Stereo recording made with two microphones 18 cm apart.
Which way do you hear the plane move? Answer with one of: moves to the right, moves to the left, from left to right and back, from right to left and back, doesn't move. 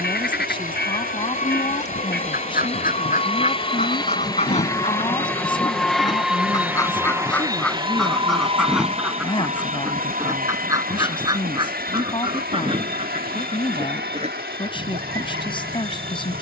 moves to the right.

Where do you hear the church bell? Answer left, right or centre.
left.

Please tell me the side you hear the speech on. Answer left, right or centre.
left.